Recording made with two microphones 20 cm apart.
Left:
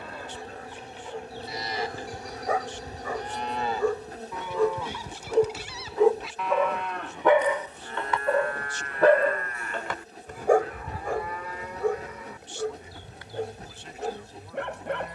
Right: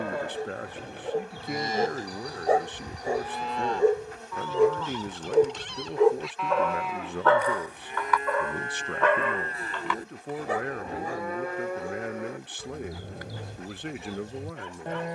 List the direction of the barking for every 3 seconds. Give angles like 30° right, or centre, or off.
40° right, 20° right, 20° left, 50° left, 60° left.